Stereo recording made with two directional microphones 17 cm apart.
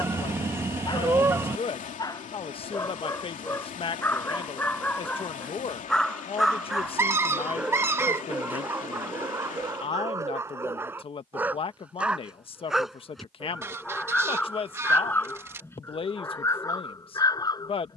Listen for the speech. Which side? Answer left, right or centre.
left.